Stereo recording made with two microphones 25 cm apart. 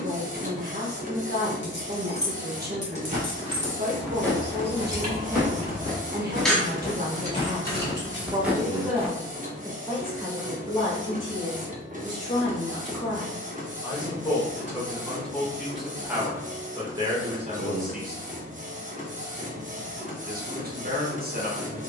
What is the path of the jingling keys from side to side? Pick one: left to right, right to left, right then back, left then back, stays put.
right then back.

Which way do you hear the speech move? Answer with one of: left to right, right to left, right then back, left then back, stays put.
left then back.